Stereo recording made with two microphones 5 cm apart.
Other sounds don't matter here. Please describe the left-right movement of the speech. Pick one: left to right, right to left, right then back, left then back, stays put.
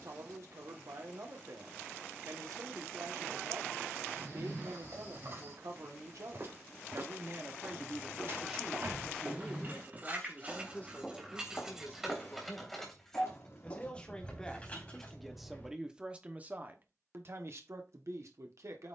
left then back.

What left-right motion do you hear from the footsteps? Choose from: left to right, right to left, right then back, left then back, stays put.
right to left.